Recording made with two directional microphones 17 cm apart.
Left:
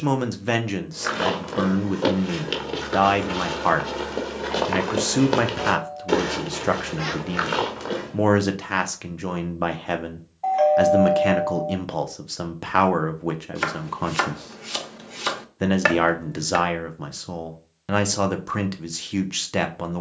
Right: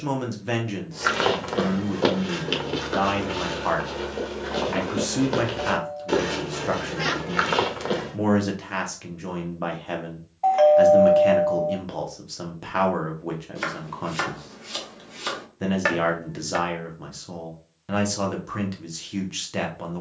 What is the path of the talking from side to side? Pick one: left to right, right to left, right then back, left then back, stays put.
stays put.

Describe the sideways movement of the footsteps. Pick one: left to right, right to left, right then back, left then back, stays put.
left then back.